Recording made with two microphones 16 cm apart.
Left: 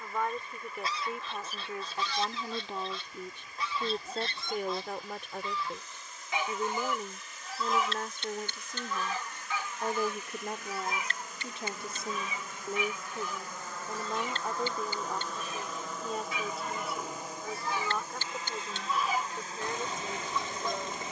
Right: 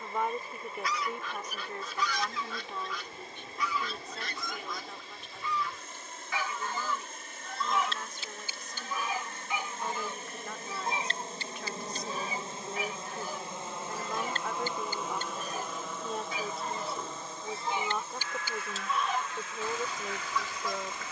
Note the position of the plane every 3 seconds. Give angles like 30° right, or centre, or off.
60° right, 60° right, 50° right, 40° right, 20° right, centre, 30° left.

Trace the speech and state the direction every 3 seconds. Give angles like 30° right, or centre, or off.
10° left, 60° left, 50° left, 40° left, 20° left, centre, 10° right.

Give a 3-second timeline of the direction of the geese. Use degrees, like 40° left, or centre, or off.
30° left, 30° left, 10° left, 20° right, 40° right, 30° right, 10° left.